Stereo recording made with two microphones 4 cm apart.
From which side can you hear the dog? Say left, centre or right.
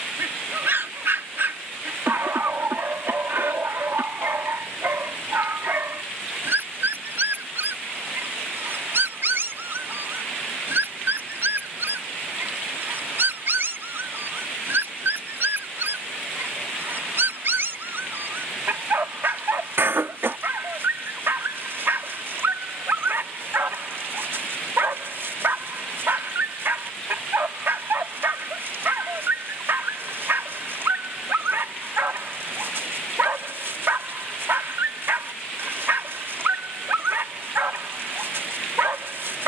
right.